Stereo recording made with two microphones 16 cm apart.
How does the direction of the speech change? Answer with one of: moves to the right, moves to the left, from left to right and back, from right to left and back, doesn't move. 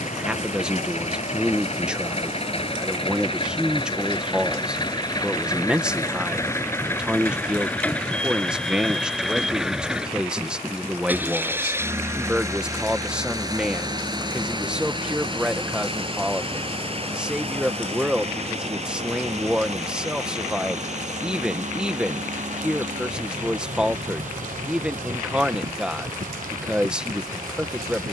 doesn't move.